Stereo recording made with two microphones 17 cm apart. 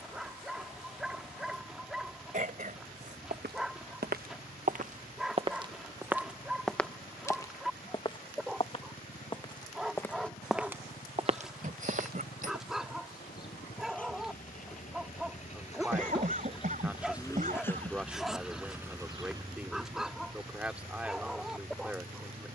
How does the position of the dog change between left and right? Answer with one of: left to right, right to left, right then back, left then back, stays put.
stays put.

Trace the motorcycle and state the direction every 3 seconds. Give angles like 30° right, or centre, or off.
80° left, 70° left, 70° left, 70° left, 60° left, 30° left, 30° right, 60° right.